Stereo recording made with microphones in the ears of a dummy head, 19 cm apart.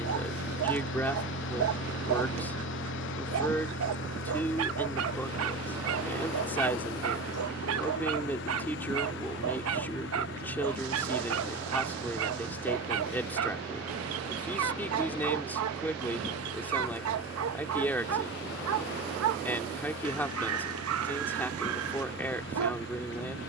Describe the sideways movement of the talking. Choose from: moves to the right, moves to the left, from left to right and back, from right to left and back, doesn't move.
doesn't move.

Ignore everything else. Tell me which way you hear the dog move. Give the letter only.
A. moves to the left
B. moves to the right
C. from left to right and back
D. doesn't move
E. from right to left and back
D.